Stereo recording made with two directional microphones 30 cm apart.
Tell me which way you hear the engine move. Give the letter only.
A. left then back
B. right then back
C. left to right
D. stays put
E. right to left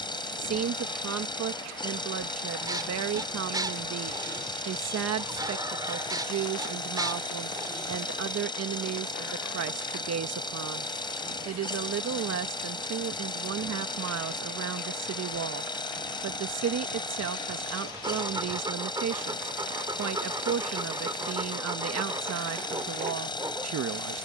D.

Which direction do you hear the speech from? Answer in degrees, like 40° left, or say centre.
60° right.